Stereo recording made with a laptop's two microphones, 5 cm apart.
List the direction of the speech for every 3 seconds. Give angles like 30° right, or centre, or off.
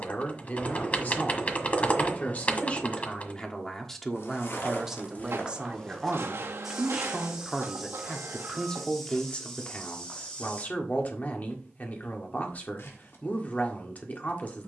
40° left, centre, centre, 40° left, 40° left.